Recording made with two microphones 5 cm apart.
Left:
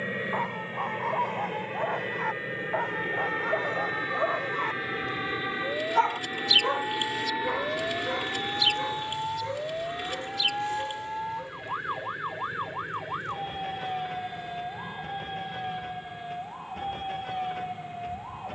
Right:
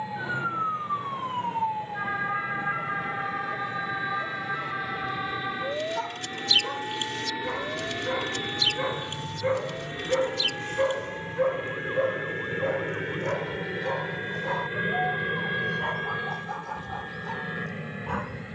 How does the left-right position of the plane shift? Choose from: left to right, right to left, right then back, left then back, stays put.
left to right.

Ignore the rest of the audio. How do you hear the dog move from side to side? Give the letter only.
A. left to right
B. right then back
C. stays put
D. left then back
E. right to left
A.